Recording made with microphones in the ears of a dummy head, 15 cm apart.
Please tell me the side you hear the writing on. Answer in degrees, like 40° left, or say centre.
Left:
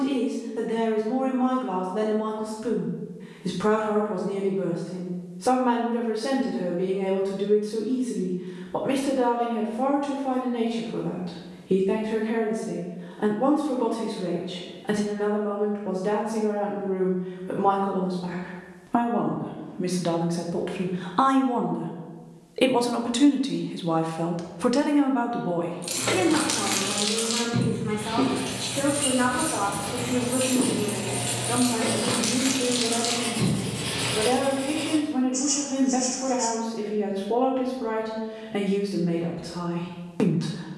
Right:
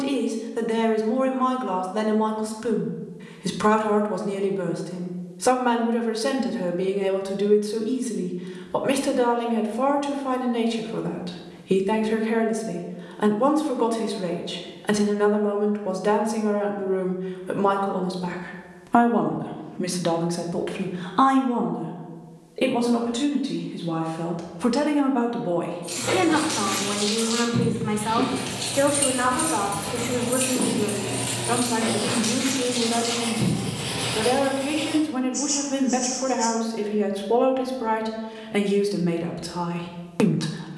20° left.